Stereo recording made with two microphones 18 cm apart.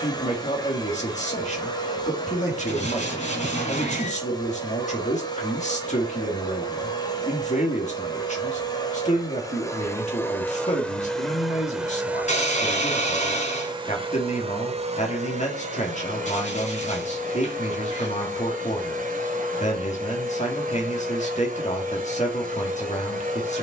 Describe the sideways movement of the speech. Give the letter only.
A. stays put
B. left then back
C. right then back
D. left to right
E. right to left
A.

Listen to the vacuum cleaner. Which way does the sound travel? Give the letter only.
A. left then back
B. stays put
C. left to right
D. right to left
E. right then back
C.